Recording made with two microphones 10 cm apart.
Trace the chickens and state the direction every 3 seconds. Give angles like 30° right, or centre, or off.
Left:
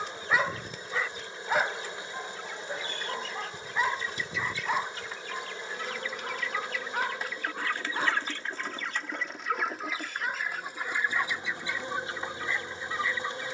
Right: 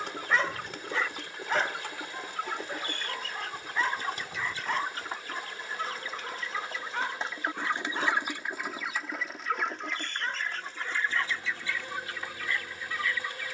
70° right, 50° right, 20° right, 10° left, 20° left.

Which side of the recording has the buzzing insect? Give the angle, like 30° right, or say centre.
30° left.